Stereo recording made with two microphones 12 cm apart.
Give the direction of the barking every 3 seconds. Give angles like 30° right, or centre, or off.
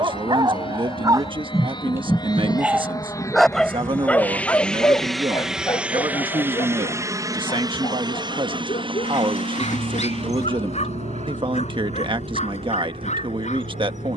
20° right, 20° left, 50° left, 60° left, 70° left.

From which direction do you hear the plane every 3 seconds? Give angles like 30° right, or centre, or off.
40° left, 10° left, 30° right, 50° right, 60° right.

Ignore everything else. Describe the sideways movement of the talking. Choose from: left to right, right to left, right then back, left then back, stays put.
stays put.